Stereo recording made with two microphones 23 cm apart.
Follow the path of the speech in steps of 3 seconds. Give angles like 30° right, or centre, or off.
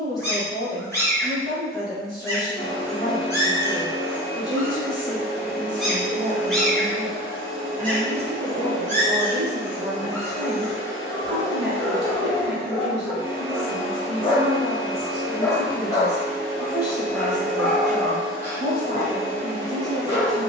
20° left, 10° left, 20° right, 30° right, centre, 20° left, 20° left.